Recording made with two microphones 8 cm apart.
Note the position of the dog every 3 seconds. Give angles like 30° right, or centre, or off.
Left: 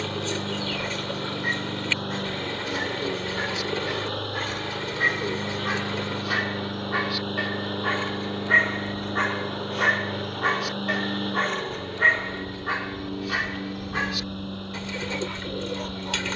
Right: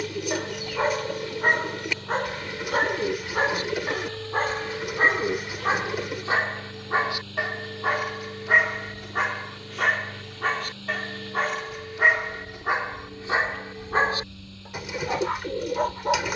50° right, 40° right, 20° right, centre, 20° right, 50° right.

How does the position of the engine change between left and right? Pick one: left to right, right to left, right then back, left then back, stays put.
stays put.